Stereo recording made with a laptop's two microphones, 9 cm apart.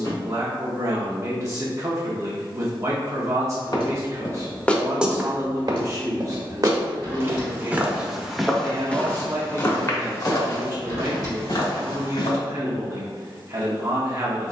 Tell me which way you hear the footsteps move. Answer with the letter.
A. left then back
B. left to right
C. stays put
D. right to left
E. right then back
E.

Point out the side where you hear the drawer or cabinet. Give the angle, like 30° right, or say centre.
40° left.